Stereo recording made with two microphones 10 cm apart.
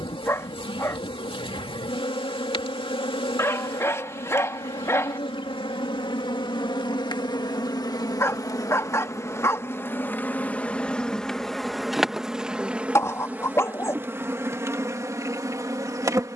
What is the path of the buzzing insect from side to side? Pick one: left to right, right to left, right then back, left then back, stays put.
left to right.